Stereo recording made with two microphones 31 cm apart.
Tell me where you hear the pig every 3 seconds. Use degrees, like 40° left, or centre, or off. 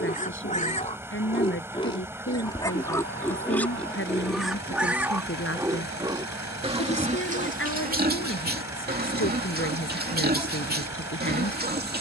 20° left, centre, 20° right, 30° right.